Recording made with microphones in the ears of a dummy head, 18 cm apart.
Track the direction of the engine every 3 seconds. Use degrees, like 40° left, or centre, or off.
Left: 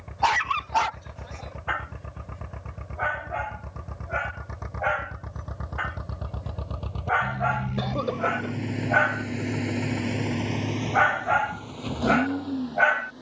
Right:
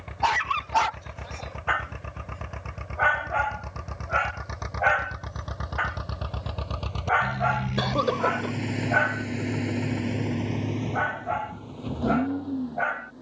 80° right, 70° right, 40° right, 20° left, 50° left.